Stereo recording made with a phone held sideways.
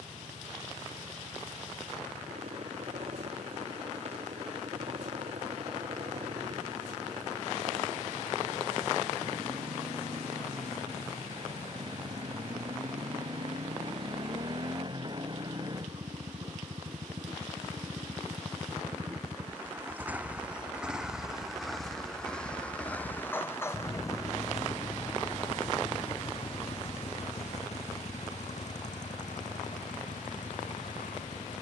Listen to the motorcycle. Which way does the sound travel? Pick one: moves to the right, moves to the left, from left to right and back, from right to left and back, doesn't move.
moves to the left.